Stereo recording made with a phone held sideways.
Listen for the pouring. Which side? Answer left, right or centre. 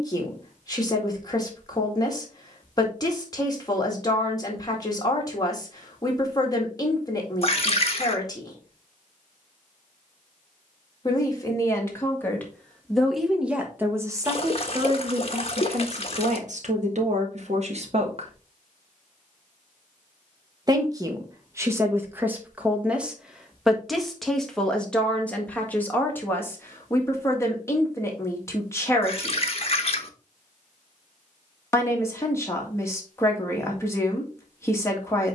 left.